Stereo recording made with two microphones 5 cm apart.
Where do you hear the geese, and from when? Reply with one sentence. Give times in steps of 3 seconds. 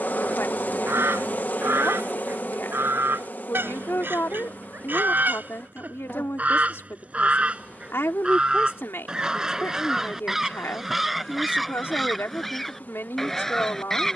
In this clip you hear the geese on the right from 0 s and in the centre from 9 s.